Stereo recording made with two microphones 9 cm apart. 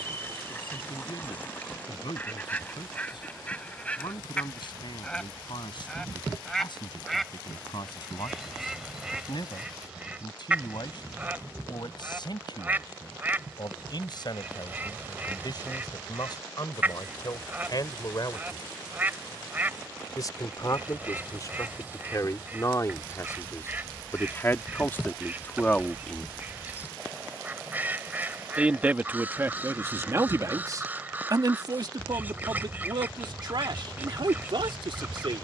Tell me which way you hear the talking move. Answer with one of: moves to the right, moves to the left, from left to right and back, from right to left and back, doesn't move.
moves to the right.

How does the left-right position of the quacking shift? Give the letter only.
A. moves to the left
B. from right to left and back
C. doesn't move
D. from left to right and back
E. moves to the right
E.